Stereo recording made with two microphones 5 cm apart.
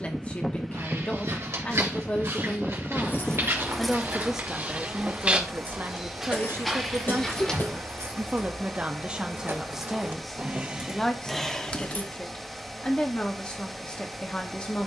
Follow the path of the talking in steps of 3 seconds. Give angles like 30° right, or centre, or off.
30° left, 20° right, 40° right, centre, 20° left.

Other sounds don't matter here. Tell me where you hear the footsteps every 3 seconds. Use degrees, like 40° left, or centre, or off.
70° right, 40° right, centre, off, off.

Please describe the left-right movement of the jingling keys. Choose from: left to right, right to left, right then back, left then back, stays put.
right then back.